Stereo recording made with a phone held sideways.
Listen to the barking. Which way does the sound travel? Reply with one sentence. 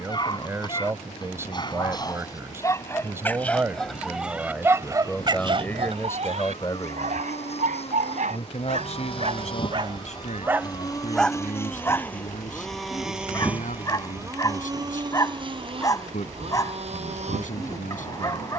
In this clip you hear the barking go right and come back.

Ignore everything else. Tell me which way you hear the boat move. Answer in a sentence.
In this clip you hear the boat travel towards the right.